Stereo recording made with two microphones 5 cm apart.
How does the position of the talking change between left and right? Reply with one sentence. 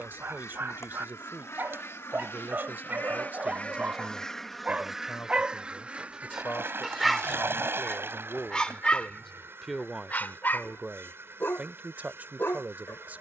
You can hear the talking go left and come back.